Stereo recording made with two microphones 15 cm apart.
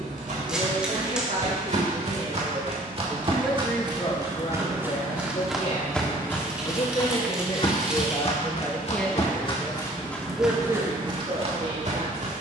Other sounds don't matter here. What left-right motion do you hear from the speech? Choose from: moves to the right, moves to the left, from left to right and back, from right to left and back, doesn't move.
from right to left and back.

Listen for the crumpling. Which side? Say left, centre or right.
centre.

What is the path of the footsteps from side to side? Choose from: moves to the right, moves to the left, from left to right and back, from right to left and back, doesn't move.
from right to left and back.